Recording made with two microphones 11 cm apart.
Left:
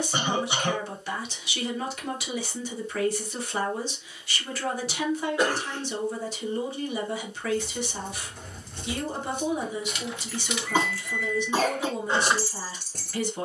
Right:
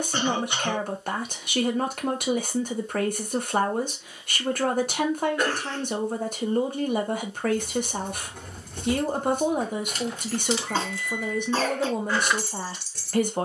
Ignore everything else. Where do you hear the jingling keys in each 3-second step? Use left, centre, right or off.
off, off, right, right, left.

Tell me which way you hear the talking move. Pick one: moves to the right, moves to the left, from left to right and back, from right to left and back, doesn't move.
doesn't move.